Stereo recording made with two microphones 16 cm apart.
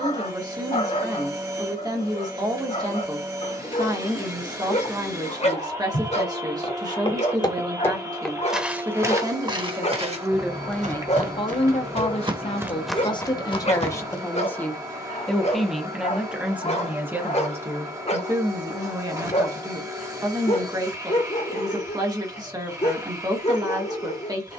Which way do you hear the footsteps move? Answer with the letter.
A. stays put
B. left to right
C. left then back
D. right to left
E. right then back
E.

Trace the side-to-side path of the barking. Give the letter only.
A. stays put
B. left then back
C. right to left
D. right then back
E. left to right
A.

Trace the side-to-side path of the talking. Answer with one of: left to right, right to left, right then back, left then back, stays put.
left then back.